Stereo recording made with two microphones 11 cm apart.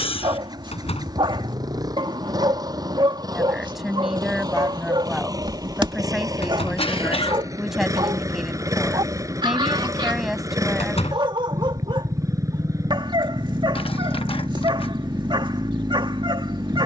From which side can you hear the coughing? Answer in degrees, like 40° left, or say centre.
60° left.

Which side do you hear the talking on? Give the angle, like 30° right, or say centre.
centre.